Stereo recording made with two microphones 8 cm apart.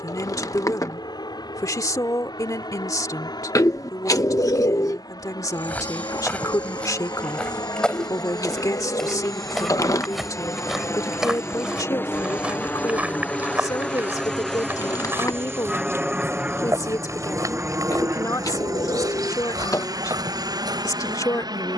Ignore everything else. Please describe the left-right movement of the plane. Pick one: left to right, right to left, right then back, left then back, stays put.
left to right.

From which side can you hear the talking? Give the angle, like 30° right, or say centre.
50° left.